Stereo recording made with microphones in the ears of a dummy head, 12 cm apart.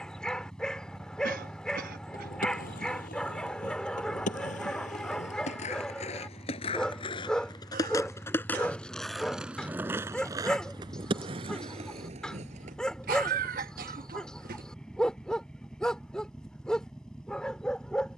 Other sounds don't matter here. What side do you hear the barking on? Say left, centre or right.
centre.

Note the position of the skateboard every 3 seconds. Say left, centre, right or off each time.
left, left, left, right, right, off.